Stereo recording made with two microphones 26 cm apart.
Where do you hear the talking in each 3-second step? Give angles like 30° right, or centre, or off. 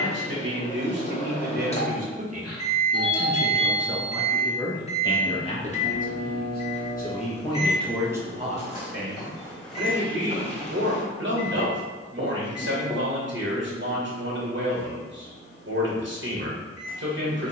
40° right, 10° left, 10° left, 50° right, 50° right, 50° right.